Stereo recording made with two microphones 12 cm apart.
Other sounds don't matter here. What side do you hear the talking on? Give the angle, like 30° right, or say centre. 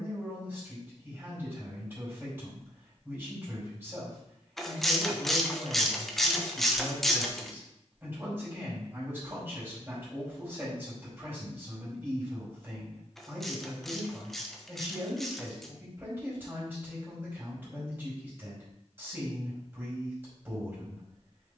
20° right.